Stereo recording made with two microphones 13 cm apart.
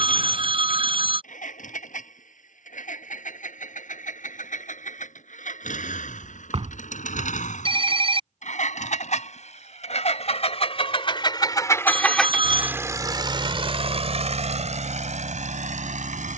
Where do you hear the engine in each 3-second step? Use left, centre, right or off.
left, left, left, left, right, right.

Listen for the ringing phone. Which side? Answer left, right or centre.
right.